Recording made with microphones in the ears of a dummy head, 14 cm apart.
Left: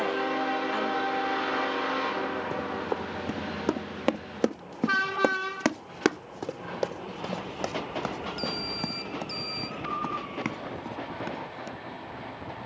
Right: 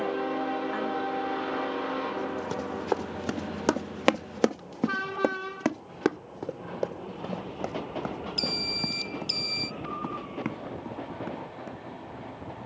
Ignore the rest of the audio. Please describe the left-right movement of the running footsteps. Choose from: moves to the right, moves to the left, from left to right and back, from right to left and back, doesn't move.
moves to the left.